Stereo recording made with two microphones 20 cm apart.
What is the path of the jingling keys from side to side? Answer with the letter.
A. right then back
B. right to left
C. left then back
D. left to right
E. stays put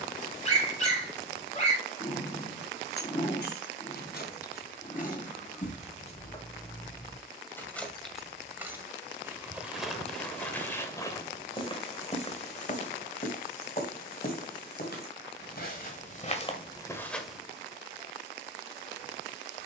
D.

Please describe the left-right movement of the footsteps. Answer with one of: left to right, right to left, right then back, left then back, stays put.
left then back.